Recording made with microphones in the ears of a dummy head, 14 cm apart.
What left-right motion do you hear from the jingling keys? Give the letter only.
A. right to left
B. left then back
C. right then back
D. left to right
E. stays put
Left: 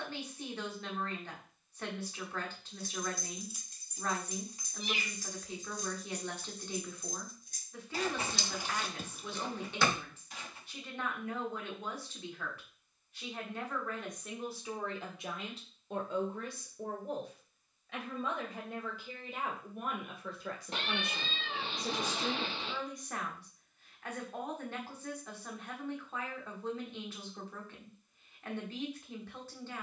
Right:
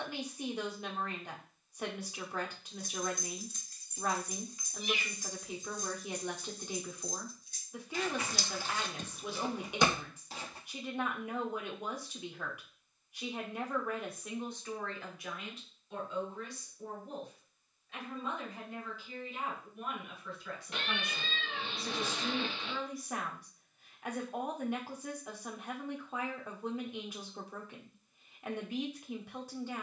B.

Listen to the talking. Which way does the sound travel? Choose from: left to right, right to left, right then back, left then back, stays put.
left then back.